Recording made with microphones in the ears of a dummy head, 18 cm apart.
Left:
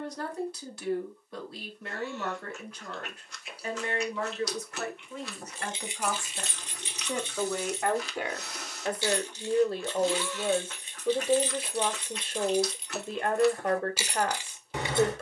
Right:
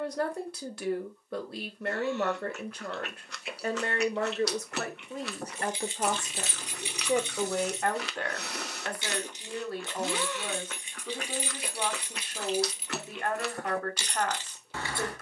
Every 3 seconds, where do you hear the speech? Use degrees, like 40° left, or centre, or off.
40° right, 30° right, centre, 20° left, 20° left.